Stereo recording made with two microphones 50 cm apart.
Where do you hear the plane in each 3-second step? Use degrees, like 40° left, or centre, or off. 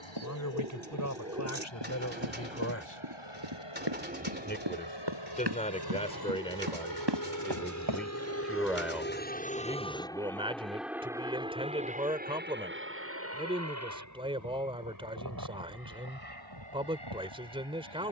70° left, 60° left, 40° left, centre, 30° right, 40° right.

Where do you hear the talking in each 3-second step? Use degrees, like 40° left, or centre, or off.
30° left, 20° left, centre, 10° right, 10° right, 10° right.